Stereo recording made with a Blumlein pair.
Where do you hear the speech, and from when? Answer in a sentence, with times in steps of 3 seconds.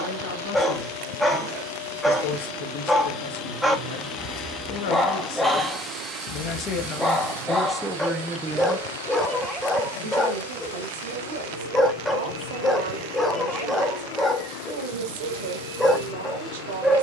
In this clip you hear the speech on the left from 0 s, in the centre from 6 s and on the right from 9 s.